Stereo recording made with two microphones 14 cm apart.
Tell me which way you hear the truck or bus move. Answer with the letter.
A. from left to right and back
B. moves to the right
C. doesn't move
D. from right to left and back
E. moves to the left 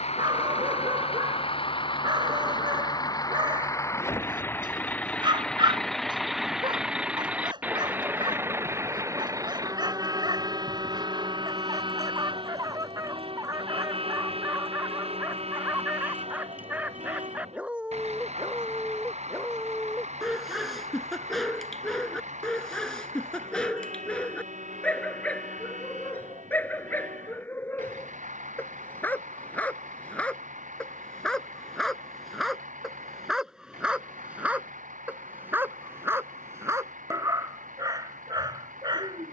B.